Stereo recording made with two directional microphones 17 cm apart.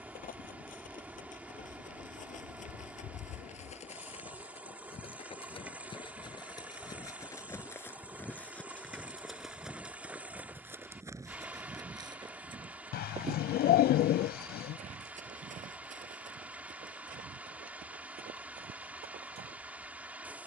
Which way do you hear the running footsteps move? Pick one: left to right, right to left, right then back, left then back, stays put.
left to right.